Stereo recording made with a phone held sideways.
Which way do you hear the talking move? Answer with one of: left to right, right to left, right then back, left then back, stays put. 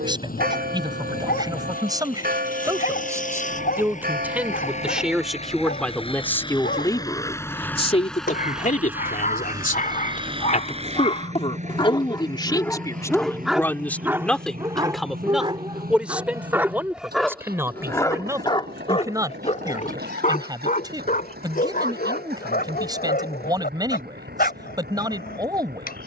left then back.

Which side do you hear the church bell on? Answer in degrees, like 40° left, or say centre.
70° right.